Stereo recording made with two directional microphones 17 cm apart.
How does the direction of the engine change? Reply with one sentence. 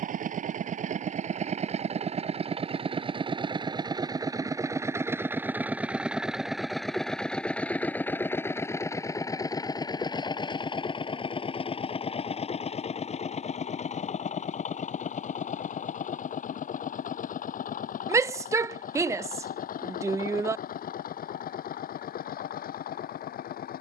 In this clip you hear the engine travel towards the left.